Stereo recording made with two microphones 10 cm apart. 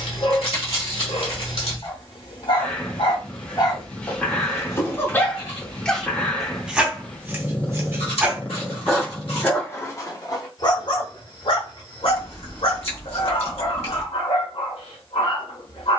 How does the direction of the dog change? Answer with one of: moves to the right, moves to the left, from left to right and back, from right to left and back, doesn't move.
from left to right and back.